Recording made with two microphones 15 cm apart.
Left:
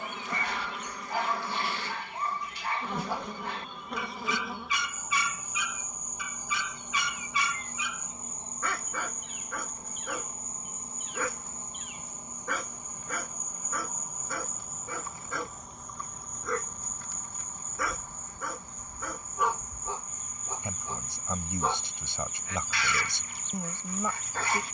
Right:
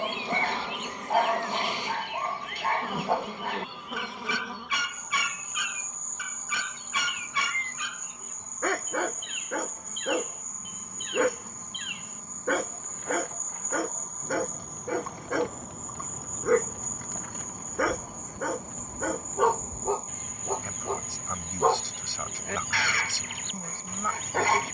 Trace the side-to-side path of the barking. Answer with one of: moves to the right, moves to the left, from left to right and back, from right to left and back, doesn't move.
doesn't move.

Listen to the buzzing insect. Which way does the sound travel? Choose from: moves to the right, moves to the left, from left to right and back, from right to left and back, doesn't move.
from right to left and back.